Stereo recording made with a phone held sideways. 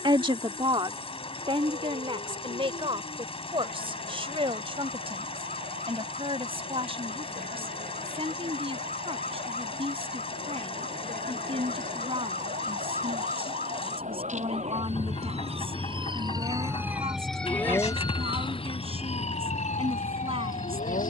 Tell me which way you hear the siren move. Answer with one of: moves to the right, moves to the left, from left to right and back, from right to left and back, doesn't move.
moves to the left.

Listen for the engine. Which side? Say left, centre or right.
left.